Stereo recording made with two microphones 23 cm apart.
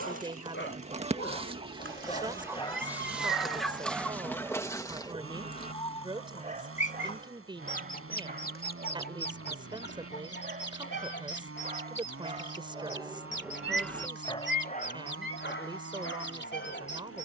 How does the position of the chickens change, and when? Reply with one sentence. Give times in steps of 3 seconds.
In this clip you hear the chickens on the right from 0 s, in the centre from 3 s and on the left from 6 s.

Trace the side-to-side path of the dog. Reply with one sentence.
You can hear the dog move from left to right and back again.